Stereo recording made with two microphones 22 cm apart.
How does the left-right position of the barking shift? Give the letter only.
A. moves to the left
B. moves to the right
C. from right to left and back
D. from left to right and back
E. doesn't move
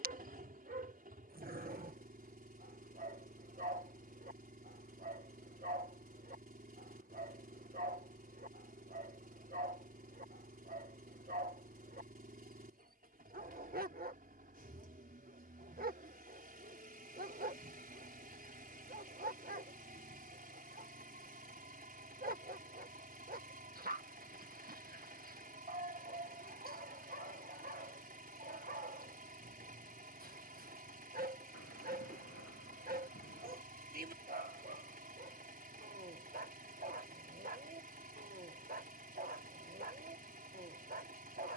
E.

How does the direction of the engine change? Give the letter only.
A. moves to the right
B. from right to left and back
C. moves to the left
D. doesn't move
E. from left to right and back
D.